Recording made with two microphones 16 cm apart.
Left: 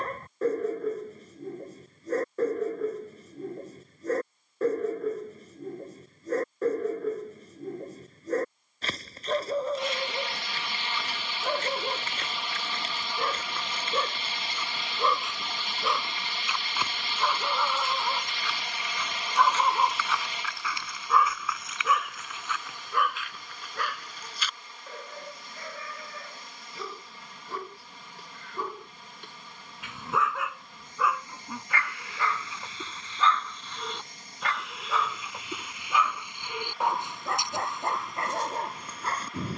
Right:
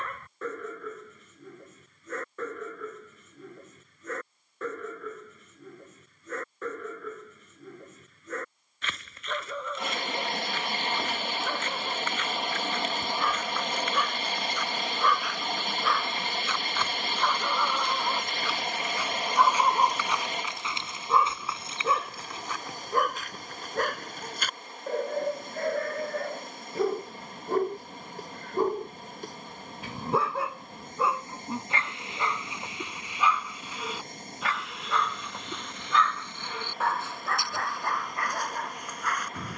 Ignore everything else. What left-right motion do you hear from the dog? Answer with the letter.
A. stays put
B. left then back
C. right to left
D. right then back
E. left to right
D.